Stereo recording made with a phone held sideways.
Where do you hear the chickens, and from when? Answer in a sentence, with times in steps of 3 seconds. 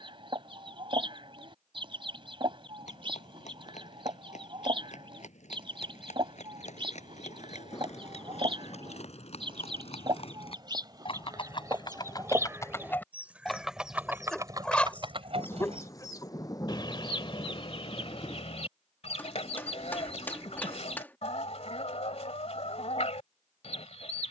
You can hear the chickens on the right from 0 s, in the centre from 12 s and on the left from 15 s.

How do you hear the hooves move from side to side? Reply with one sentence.
You can hear the hooves travel towards the right.